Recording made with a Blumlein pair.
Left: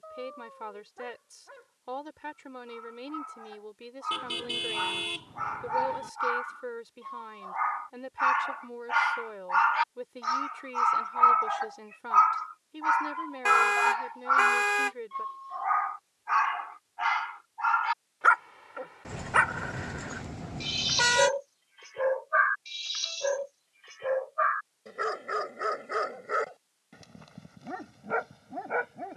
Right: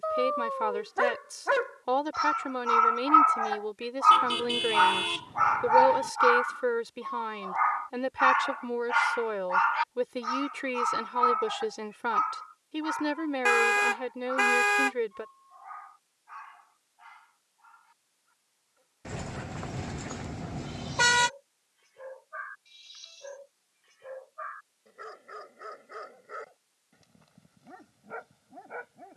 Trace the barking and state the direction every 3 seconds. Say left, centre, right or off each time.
right, right, centre, centre, left, left, left, left, left, left.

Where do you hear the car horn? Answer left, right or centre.
centre.